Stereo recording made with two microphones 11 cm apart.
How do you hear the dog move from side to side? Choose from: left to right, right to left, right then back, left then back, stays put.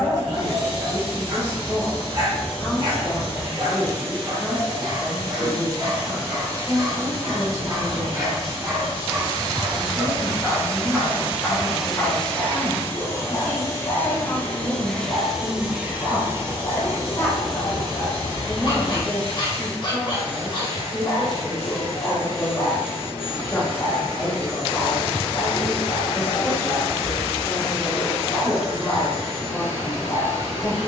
right to left.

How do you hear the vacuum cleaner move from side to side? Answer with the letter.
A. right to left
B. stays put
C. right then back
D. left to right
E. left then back
E.